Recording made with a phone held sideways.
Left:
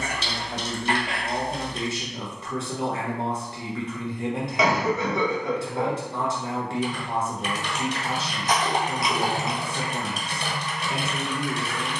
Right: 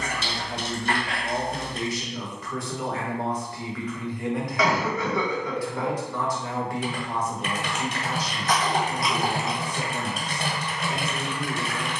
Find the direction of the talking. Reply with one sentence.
You can hear the talking on the left.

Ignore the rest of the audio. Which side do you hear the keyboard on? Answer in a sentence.
You can hear the keyboard on the right.